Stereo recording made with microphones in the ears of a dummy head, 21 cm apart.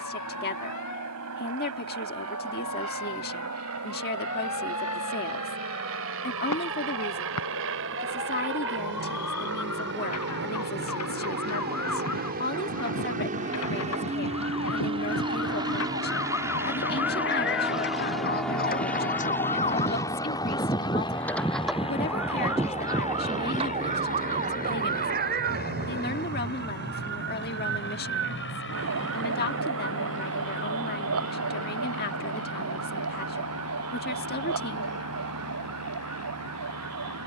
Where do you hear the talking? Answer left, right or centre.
left.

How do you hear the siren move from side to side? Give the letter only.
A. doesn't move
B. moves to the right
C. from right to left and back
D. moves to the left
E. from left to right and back
B.